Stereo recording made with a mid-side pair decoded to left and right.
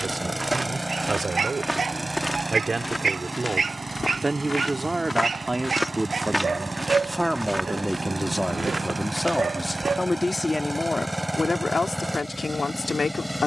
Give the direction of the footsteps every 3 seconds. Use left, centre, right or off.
centre, left, centre, right, off.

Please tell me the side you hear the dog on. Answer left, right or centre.
right.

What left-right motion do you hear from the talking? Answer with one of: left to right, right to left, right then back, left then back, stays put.
right to left.